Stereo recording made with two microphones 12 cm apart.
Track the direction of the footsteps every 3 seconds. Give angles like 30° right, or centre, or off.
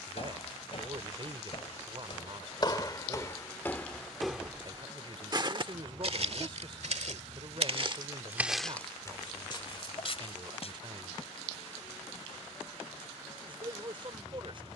50° left, centre, 40° right, 40° left, off.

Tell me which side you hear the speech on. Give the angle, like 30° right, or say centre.
40° right.